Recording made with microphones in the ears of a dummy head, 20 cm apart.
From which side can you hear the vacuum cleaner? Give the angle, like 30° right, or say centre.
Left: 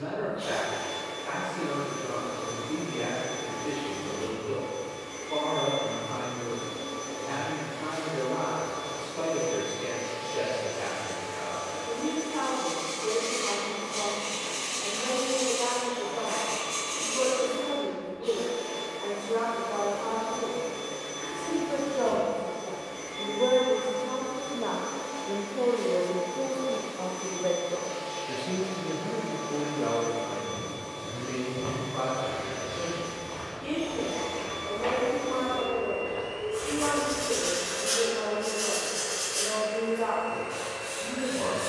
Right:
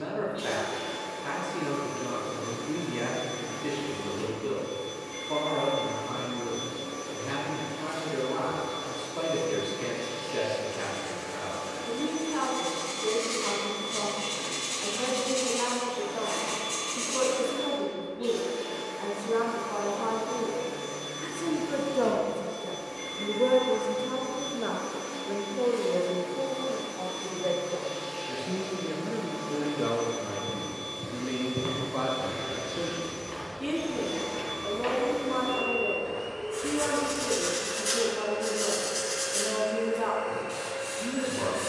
80° right.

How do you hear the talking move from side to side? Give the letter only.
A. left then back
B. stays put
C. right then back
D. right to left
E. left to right
A.